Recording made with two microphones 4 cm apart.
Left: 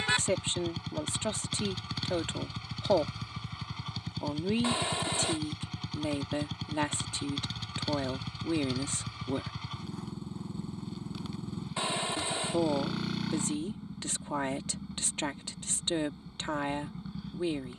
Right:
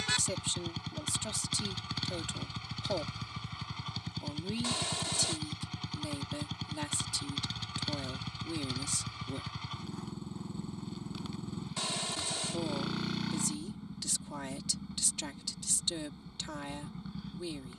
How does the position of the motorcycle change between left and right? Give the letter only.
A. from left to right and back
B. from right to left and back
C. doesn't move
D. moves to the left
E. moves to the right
C.